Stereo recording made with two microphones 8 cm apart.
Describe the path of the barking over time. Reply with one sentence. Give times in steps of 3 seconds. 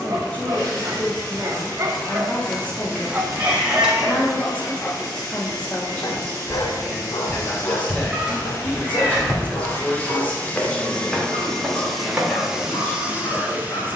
You can hear the barking on the right from 0 s, in the centre from 3 s and on the left from 6 s.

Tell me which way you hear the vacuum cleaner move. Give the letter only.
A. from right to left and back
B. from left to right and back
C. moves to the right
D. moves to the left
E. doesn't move
C.